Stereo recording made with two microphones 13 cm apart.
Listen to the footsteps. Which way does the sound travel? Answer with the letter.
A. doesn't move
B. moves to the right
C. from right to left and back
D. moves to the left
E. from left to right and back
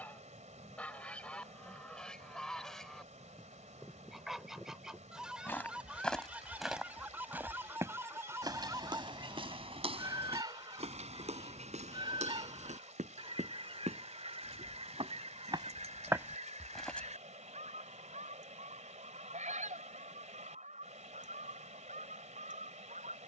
E.